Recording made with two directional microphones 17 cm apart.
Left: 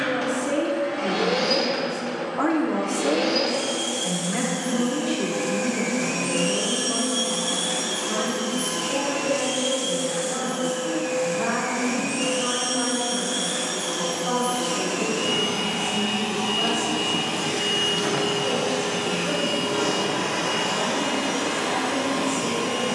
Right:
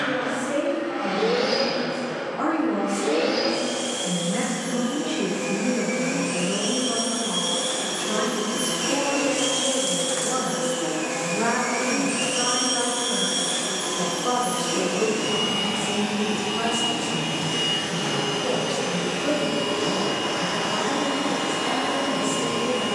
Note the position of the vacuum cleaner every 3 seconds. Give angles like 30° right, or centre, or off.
50° left, 50° left, 20° left, 30° right, 10° right, 20° left, 40° left, 50° left.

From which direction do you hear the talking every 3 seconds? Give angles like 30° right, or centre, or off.
40° left, 10° left, 20° right, 30° right, 40° right, 50° right, 60° right, 60° right.